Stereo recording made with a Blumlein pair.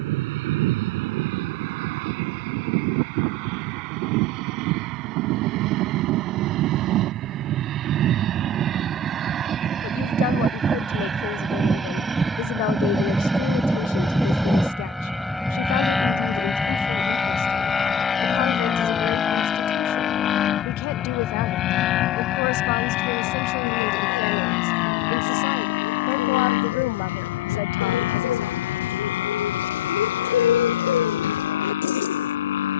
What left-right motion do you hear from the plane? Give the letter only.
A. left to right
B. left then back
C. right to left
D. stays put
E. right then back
C.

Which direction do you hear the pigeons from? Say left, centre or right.
left.